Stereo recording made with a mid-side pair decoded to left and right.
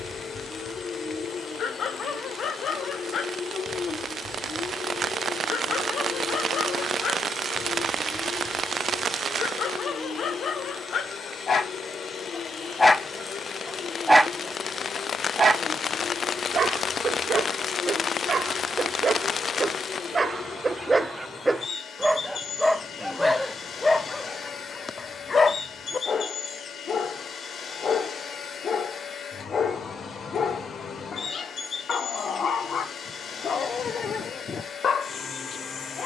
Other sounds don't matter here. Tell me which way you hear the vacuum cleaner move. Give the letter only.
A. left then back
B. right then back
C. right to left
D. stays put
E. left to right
D.